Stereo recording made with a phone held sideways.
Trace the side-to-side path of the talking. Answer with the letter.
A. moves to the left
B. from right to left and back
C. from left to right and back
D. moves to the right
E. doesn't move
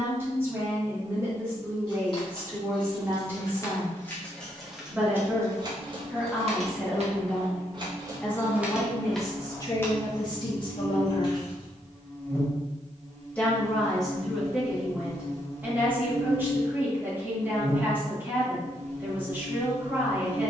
B.